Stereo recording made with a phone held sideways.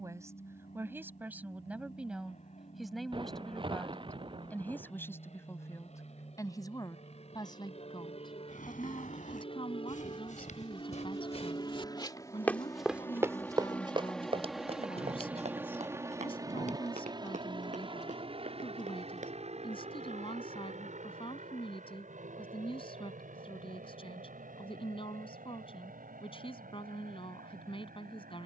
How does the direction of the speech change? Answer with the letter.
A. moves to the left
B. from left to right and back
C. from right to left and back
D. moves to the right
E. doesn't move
A.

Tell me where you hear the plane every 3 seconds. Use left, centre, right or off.
left, left, left, left, centre, right, right, right, right, right.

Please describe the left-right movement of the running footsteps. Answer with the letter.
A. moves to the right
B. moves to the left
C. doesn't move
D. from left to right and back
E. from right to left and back
A.